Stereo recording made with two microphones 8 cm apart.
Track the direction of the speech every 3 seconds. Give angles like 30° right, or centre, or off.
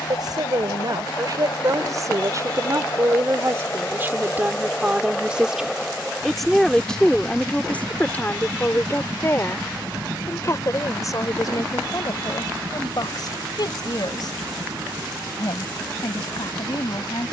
50° right, 20° right, 10° left, 40° left, 50° left, 60° left.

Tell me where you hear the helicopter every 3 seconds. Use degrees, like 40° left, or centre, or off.
50° left, 20° left, 10° right, 30° right, 40° right, 50° right.